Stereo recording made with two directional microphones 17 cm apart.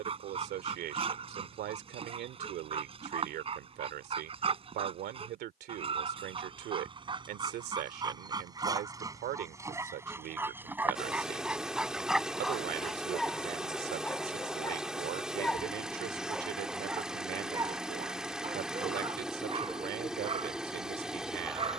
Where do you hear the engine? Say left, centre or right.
centre.